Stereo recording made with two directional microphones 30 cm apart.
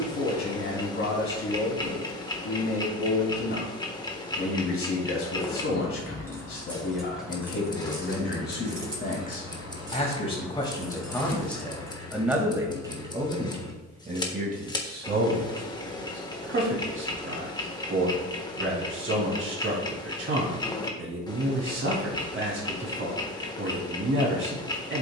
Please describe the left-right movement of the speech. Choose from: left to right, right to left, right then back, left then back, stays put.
left to right.